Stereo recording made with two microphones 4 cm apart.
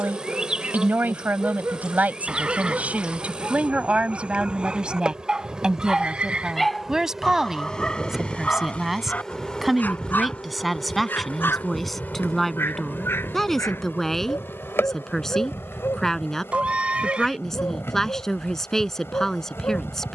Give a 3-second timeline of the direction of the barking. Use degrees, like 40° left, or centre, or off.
50° right, 30° right, 20° left, 50° left, 60° left, 70° left, 80° left.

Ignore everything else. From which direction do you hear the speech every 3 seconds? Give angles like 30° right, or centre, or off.
40° right, 20° right, 10° right, centre, 10° left, 10° left, 10° left.